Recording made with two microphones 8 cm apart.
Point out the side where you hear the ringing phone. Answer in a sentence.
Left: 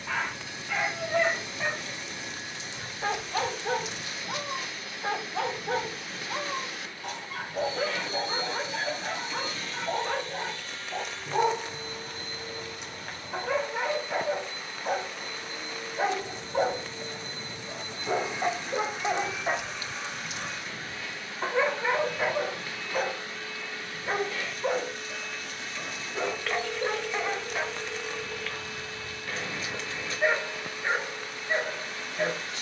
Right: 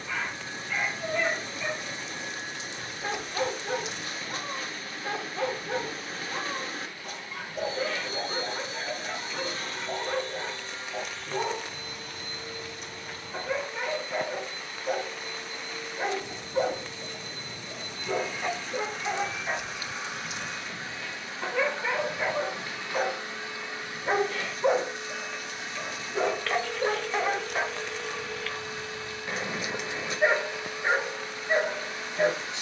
You can hear the ringing phone in the centre.